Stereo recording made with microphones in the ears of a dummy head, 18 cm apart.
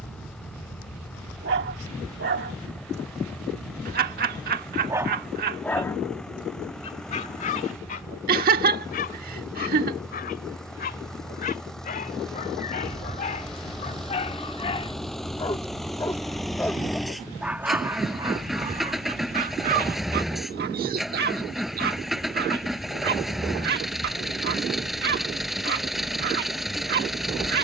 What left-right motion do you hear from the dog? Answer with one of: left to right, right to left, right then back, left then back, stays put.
left then back.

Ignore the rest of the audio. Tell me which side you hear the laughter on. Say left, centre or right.
right.